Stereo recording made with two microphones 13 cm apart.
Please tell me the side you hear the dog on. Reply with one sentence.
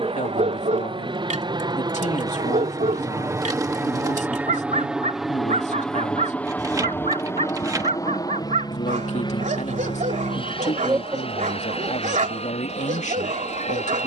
In this clip you hear the dog on the right.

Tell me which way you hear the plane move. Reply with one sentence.
In this clip you hear the plane travel towards the left.